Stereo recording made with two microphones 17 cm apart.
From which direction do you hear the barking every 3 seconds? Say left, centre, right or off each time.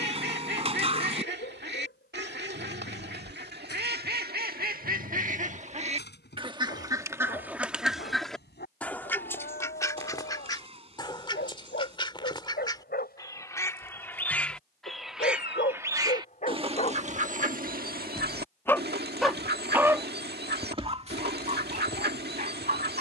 left, left, left, left, left, left, centre, right.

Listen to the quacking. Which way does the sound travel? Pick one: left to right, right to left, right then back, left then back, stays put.
left then back.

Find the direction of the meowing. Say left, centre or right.
right.